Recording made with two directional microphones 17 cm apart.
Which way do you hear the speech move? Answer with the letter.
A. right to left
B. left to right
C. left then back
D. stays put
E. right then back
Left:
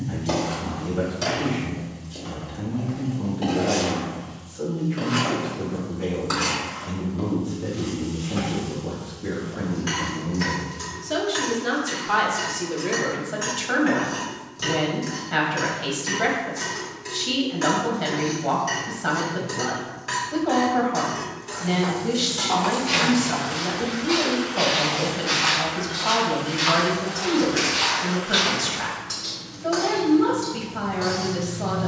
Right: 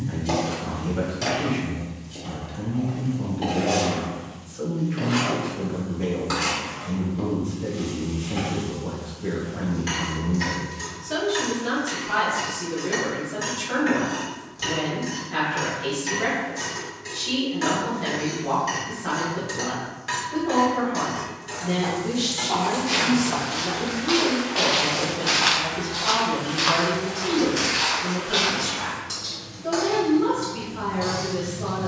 A.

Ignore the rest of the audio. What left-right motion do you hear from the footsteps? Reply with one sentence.
In this clip you hear the footsteps go right and come back.